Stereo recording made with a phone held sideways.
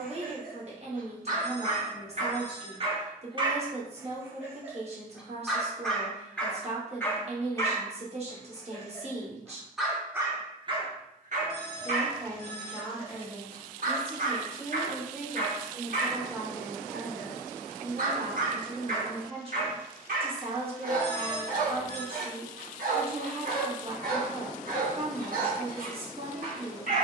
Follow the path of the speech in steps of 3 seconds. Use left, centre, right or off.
right, right, right, right, centre, centre, right, right, right.